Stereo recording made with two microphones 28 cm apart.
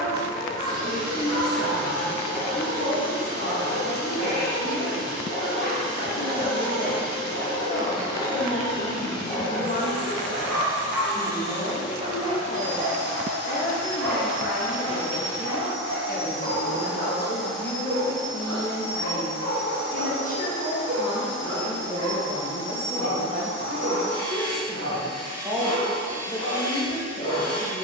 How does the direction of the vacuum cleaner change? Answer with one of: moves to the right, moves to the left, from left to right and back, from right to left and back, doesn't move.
moves to the left.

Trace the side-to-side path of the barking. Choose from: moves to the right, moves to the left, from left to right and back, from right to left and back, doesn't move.
moves to the right.